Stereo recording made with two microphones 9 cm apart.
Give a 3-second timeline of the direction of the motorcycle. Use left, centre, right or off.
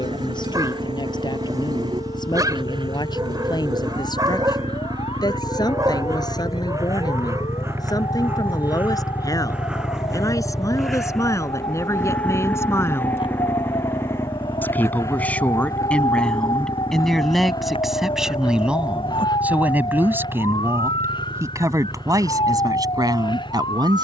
right, right, right, centre, left, left, left, left.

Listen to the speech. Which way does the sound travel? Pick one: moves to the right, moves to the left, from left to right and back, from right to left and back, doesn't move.
moves to the right.